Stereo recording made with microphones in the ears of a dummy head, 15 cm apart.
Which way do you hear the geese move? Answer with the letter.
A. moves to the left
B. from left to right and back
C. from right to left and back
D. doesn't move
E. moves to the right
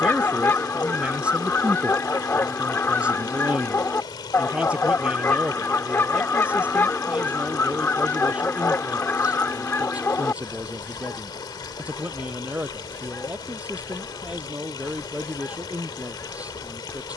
D.